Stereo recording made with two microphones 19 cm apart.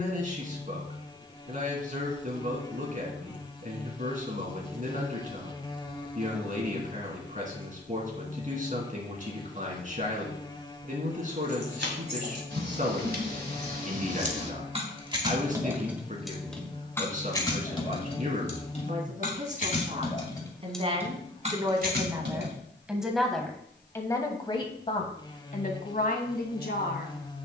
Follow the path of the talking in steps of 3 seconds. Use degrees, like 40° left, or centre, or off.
40° right, 40° right, 40° right, 40° right, 40° right, 40° right, 40° right, 10° right, 40° left.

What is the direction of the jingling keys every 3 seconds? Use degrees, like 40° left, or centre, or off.
off, off, off, 70° right, 50° right, centre, 30° left, 50° right, off.